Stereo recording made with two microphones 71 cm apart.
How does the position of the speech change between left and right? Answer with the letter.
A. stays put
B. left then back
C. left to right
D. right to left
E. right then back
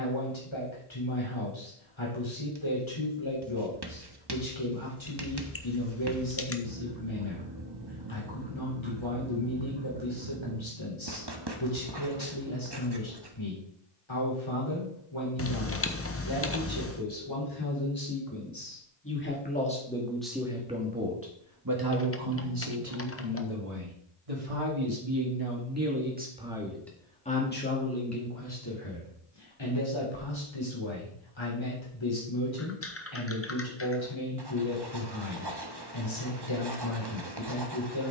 E.